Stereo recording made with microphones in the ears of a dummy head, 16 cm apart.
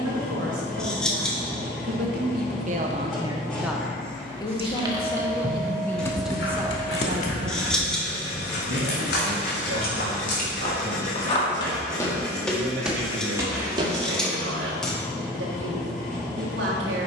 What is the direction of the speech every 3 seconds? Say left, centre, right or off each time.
right, centre, right, right, right, right.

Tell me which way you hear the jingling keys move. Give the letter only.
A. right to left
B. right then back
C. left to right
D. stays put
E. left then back
A.